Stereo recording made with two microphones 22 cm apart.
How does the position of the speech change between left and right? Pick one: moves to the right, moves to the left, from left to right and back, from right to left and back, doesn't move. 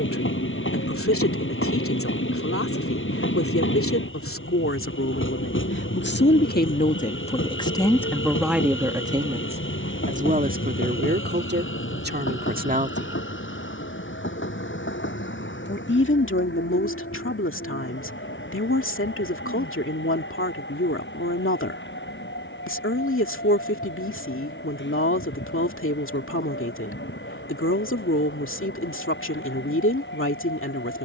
from left to right and back.